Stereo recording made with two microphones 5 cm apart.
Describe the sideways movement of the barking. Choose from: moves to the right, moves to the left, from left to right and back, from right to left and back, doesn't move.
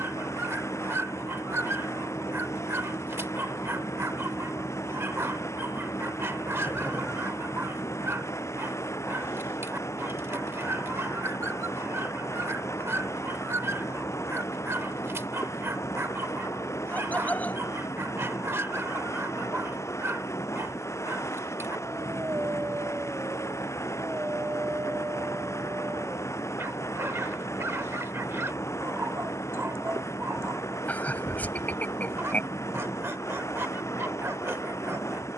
doesn't move.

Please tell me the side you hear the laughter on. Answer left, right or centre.
left.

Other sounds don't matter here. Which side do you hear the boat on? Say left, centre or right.
left.